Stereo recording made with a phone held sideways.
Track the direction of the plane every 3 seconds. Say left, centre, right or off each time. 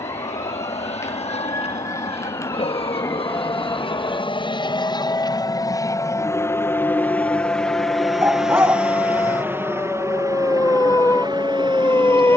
left, left, centre, right.